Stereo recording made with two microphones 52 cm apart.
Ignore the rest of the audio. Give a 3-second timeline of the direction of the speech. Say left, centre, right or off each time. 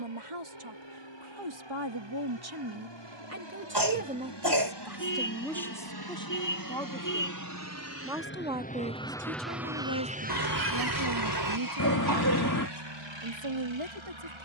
right, centre, centre, right, right.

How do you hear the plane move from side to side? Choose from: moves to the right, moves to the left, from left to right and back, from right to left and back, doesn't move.
moves to the right.